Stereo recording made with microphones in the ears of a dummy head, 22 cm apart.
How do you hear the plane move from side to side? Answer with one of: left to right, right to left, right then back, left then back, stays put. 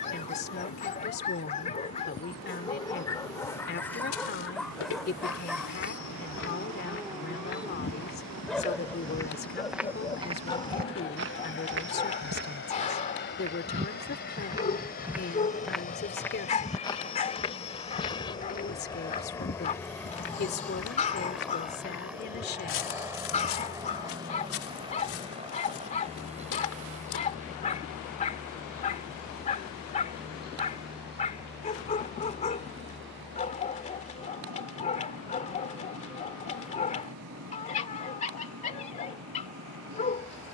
left to right.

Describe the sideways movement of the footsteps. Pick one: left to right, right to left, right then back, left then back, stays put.
right then back.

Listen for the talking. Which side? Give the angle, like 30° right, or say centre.
40° left.